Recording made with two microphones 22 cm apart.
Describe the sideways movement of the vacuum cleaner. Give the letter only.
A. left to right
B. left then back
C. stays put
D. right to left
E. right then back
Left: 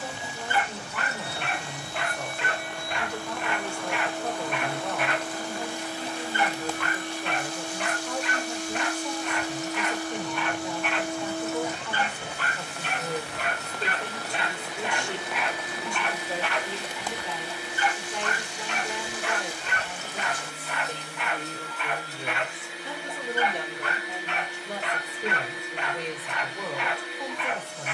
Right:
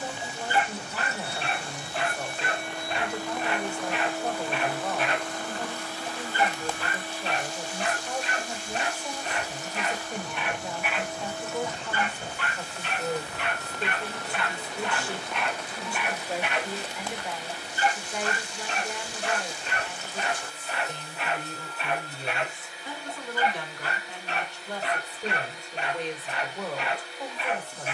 D.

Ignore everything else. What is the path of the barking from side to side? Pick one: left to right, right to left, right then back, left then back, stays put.
left then back.